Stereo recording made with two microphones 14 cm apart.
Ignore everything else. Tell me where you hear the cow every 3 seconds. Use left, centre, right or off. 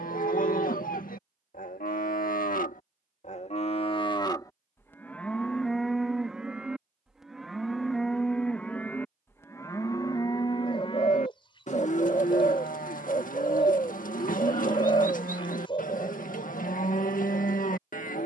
left, left, centre, left, left, left.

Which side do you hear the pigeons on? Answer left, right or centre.
left.